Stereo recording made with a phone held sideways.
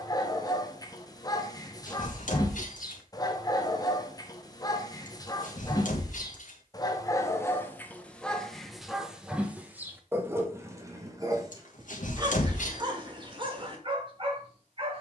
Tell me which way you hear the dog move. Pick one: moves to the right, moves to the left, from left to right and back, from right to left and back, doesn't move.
moves to the right.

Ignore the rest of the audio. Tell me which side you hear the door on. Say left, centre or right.
left.